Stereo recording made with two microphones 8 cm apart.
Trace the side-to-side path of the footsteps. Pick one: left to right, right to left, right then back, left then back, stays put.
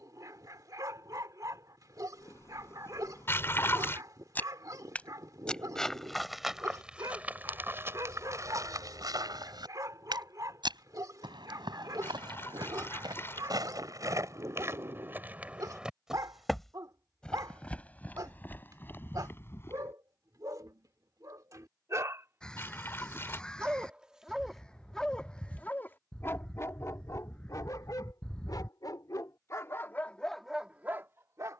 right then back.